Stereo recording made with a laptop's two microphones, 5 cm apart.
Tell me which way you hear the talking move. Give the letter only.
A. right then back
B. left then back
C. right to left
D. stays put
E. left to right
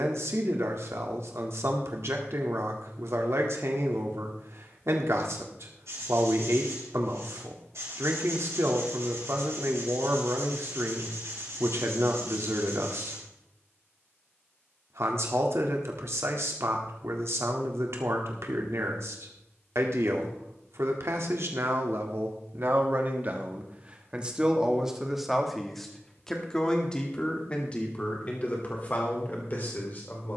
C.